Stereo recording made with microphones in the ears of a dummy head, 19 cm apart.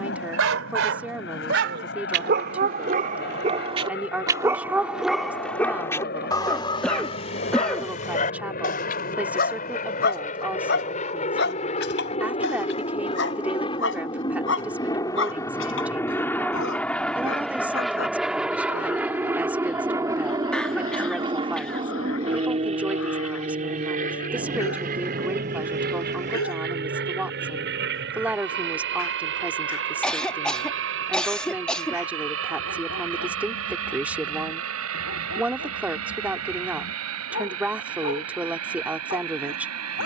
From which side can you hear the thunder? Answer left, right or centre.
right.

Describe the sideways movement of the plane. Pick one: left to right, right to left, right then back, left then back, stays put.
left to right.